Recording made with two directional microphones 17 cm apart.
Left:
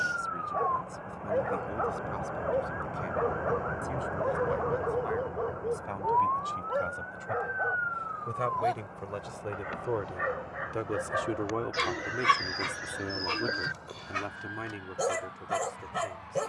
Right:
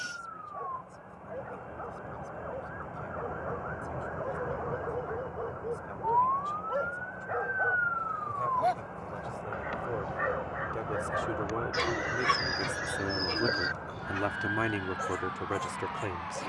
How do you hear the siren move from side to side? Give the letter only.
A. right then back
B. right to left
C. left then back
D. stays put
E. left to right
E.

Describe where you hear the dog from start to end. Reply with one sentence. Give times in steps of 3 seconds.
In this clip you hear the dog on the left from 0 s, in the centre from 6 s and on the left from 12 s.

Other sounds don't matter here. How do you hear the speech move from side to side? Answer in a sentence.
In this clip you hear the speech go from the left side to the right.